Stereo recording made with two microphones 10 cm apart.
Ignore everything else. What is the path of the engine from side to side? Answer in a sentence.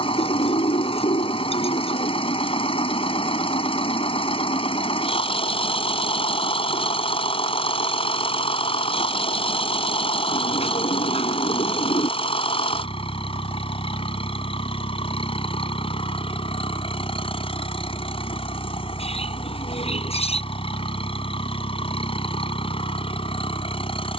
In this clip you hear the engine stay put.